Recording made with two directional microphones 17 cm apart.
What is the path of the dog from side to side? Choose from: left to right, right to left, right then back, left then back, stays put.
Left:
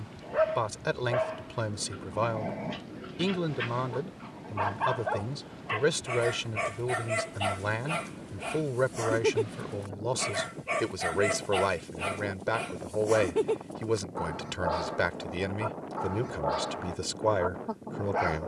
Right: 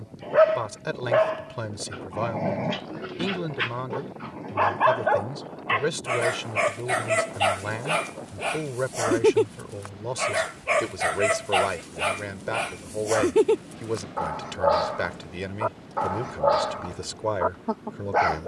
stays put.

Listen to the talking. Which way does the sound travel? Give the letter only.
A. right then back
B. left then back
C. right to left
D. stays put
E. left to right
D.